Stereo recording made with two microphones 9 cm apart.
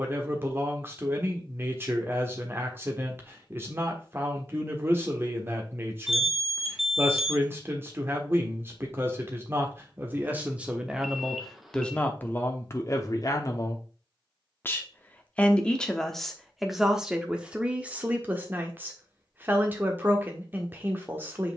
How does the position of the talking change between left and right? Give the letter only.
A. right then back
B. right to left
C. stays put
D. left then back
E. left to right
D.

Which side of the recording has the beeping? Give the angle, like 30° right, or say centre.
centre.